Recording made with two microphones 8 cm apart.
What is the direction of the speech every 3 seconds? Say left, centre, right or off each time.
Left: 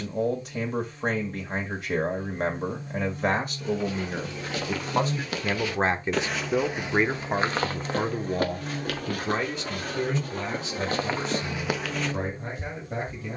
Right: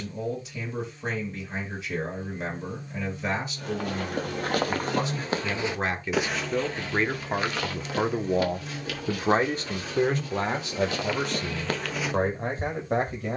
left, left, centre, right, right.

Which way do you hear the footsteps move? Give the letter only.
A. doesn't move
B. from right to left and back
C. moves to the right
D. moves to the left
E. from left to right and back
B.